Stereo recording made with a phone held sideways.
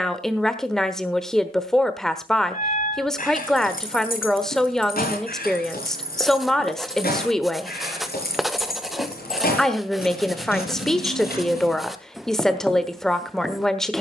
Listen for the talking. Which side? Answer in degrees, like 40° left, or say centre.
centre.